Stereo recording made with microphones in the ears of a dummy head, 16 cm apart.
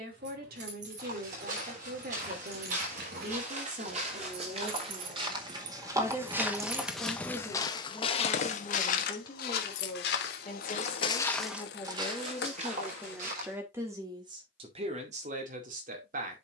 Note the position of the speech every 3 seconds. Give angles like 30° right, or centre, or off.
60° right, 40° right, centre, 30° left, 10° right, 50° right.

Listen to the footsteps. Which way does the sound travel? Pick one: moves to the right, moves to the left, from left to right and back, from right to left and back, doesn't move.
from right to left and back.